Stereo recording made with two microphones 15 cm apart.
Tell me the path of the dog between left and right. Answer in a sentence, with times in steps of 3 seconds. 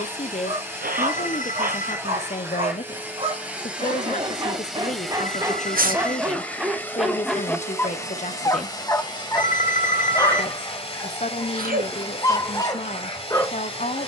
You can hear the dog on the right from 0 s, in the centre from 6 s and on the left from 9 s.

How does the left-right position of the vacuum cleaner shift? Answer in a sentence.
In this clip you hear the vacuum cleaner travel towards the left.